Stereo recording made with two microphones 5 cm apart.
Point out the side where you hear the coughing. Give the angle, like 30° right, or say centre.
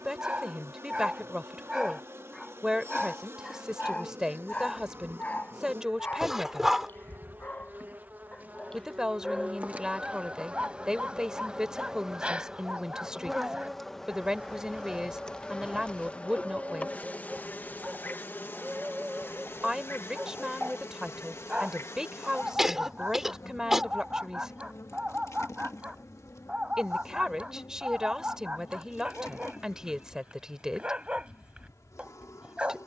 10° right.